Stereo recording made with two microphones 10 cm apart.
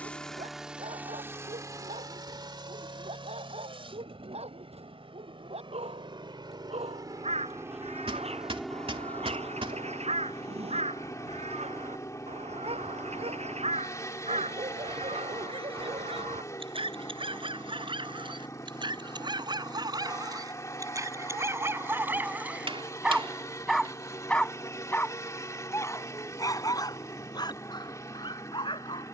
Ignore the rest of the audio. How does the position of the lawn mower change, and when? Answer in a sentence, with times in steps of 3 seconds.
In this clip you hear the lawn mower on the right from 0 s and on the left from 9 s.